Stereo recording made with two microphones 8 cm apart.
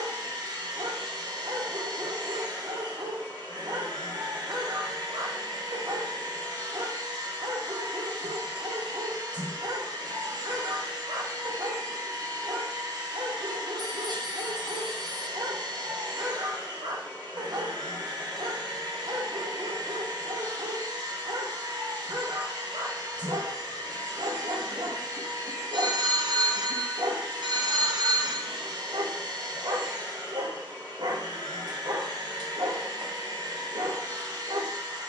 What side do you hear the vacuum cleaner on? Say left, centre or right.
right.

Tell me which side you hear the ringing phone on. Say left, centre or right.
right.